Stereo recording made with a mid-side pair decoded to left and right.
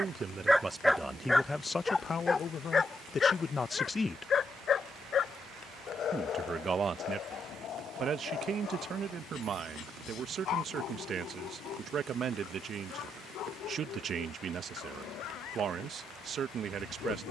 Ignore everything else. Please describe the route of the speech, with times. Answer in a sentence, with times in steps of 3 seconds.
You can hear the speech in the centre from 0 s, on the left from 3 s and on the right from 6 s.